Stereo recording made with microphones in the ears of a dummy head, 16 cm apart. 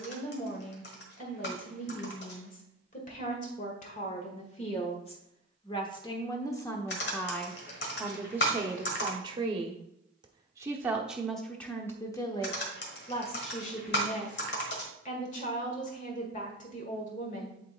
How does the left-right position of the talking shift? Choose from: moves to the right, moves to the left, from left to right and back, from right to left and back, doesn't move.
from left to right and back.